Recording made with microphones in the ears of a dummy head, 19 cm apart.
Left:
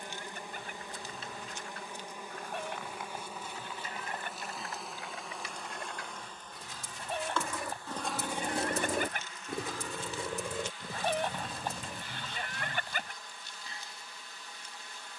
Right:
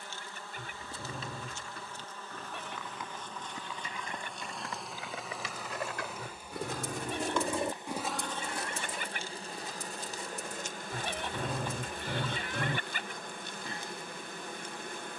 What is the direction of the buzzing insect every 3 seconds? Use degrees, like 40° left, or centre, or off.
10° left, centre, 20° right, 40° right, 40° right.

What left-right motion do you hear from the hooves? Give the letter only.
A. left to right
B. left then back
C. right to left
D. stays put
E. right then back
C.